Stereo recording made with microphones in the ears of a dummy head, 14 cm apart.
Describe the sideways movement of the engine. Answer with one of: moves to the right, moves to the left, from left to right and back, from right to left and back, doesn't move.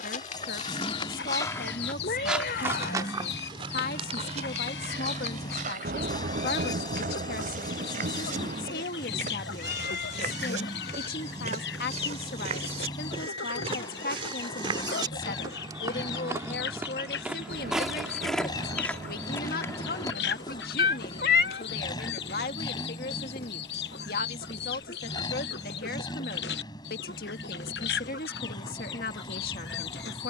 doesn't move.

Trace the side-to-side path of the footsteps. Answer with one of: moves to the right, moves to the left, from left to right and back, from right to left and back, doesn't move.
from left to right and back.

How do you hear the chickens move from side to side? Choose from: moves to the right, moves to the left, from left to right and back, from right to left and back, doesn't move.
doesn't move.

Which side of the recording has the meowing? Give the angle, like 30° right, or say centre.
70° left.